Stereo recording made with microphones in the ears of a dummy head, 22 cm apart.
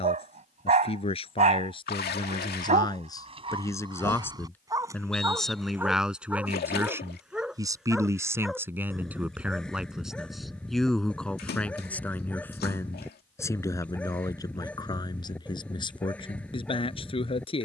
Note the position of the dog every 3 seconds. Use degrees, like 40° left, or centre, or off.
30° right, 20° right, centre, centre, 10° left, 10° left.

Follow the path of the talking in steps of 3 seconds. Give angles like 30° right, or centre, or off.
20° left, 10° left, 10° right, centre, 10° left, 20° left.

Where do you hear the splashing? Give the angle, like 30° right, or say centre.
40° left.